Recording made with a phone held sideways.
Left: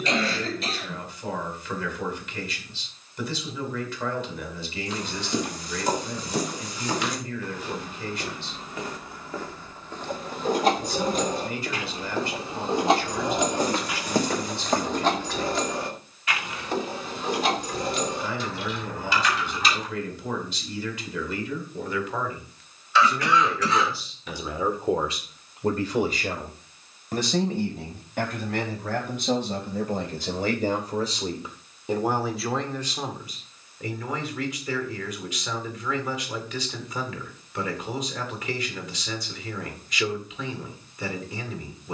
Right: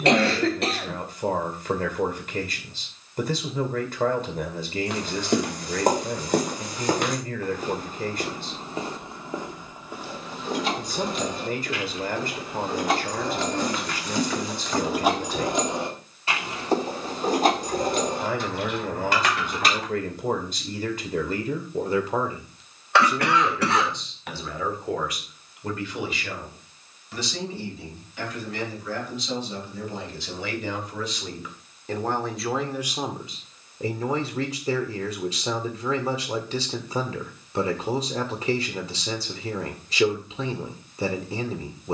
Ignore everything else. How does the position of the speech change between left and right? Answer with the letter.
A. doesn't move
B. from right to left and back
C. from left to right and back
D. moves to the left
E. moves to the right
B.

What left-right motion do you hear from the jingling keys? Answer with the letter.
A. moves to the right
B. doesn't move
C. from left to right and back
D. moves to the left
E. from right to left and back
A.